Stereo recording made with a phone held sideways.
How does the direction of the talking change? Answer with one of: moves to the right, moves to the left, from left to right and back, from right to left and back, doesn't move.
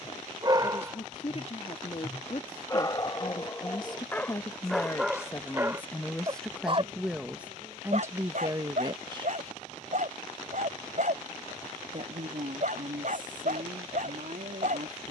moves to the right.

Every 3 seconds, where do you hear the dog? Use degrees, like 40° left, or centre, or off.
10° right, 10° left, 50° right, 60° right, 60° right.